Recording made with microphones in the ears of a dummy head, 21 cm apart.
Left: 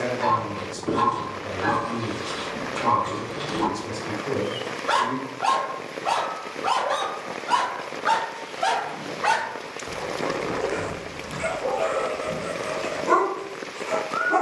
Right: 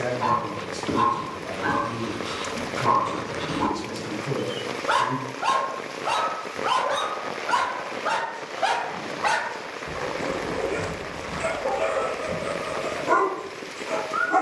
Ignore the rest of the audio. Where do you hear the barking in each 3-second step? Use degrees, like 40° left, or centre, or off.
50° left, 50° left, 40° left, 10° left, 40° left.